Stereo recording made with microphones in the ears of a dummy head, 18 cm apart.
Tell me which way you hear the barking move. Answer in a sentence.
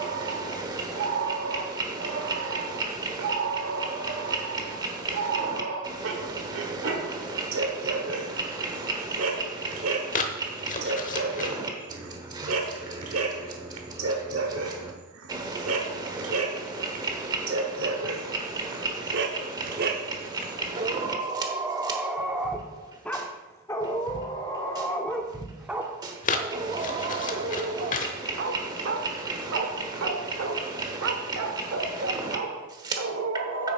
You can hear the barking go left and come back.